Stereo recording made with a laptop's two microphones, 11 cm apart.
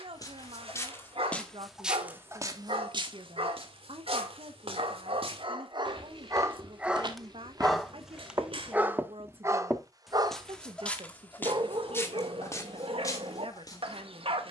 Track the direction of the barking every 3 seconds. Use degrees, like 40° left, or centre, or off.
70° right, 60° right, 10° right, 40° right, 60° right.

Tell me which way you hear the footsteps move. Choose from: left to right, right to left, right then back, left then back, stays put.
right then back.